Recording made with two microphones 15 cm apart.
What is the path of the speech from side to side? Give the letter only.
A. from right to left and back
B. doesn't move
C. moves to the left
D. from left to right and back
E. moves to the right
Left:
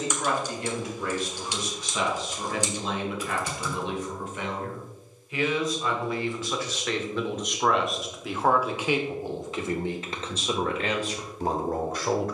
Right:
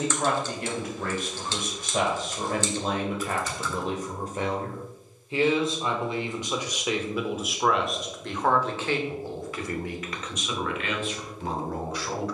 C.